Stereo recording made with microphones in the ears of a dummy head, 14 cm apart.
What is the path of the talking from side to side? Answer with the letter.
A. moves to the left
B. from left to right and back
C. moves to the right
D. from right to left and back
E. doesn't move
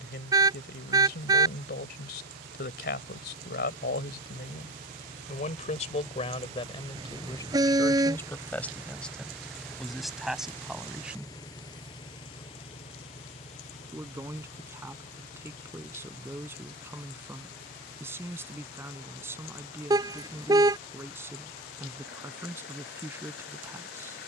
C.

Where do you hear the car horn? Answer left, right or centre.
right.